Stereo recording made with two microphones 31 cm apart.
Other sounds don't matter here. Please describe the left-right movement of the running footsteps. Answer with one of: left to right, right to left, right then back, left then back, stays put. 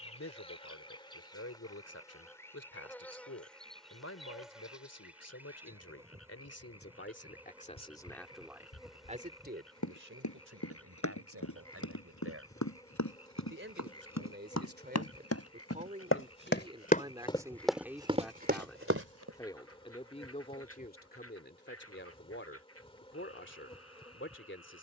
left to right.